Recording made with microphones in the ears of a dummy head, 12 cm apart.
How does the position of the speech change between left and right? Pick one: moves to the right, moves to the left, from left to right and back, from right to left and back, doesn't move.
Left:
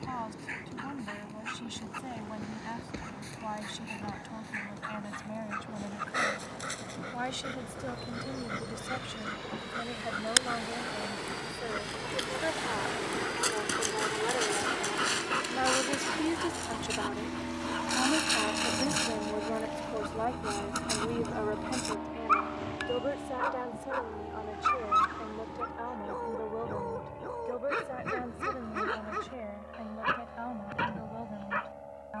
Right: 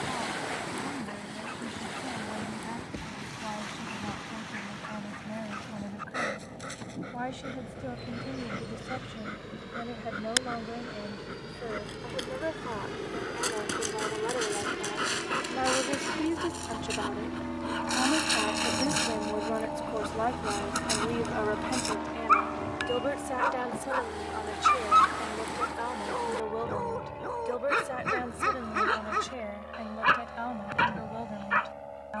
moves to the right.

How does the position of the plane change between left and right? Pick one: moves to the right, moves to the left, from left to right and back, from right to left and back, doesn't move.
moves to the right.